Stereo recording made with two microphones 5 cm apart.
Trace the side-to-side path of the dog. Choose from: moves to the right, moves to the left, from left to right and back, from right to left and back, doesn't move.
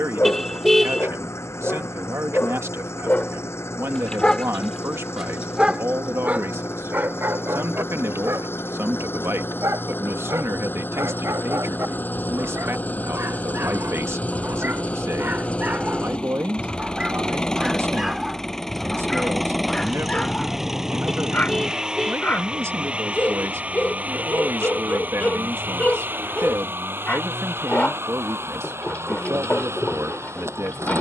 from left to right and back.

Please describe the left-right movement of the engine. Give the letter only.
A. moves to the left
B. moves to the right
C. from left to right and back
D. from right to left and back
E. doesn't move
B.